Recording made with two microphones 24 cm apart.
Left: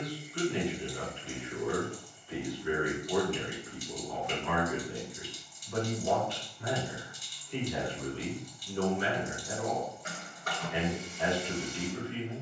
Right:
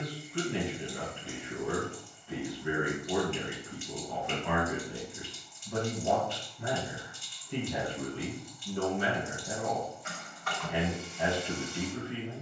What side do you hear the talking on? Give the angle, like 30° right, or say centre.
60° right.